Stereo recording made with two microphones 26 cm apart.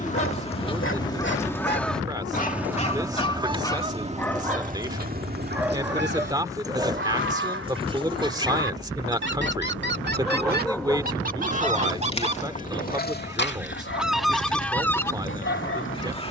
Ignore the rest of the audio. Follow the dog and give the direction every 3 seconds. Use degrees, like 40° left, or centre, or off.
40° left, 10° left, 20° right, 10° left, 40° left, 50° left.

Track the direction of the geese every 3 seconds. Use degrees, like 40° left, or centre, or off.
10° left, 30° right, 50° right, 40° right, 10° right, 20° left.